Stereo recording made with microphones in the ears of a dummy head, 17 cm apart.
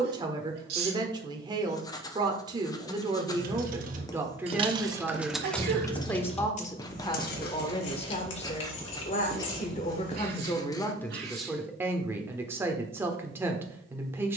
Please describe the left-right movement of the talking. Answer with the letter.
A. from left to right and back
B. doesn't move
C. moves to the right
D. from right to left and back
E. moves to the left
D.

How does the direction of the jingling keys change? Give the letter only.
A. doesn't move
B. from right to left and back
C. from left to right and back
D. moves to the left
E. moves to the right
D.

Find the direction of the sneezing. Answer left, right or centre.
right.